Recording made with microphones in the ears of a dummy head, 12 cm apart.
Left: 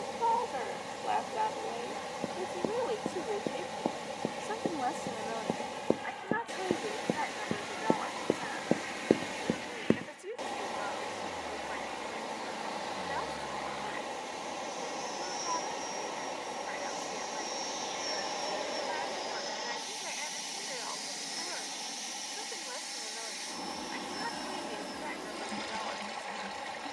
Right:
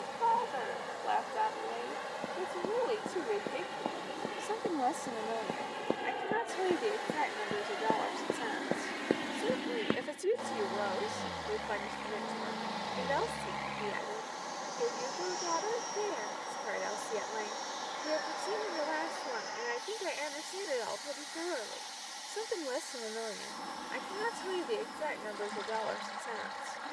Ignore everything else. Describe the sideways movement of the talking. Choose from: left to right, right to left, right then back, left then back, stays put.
left to right.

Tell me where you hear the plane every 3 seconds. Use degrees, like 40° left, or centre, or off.
60° right, 60° right, 50° right, 40° right, 20° right, 10° left, 30° left, 50° left, 60° left.